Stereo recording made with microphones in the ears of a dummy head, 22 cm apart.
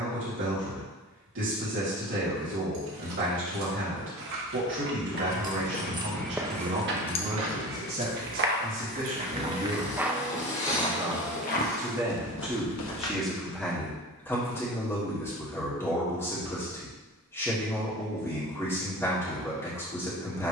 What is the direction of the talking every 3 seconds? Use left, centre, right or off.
right, right, right, right, centre, centre, centre.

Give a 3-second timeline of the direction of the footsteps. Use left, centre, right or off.
off, left, right, centre, left, off, off.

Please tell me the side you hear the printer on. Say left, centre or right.
left.